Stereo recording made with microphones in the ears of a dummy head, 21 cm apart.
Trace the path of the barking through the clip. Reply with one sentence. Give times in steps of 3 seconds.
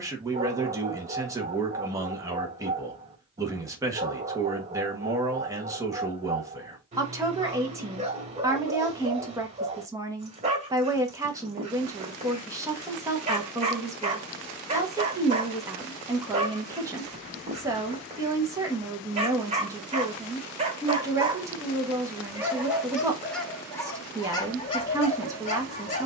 In this clip you hear the barking on the right from 0 s, in the centre from 21 s and on the left from 24 s.